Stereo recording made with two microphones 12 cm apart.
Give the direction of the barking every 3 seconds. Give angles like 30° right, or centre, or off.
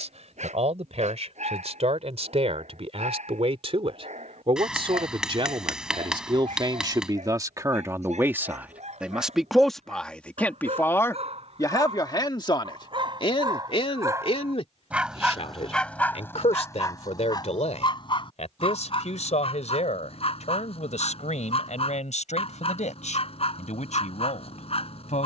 80° right, 80° right, 70° right, 60° right, 40° right, 20° left, 50° left, 60° left, 60° left.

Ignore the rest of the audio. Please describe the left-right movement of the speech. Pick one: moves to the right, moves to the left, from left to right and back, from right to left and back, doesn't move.
moves to the left.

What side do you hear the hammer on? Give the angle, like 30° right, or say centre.
10° right.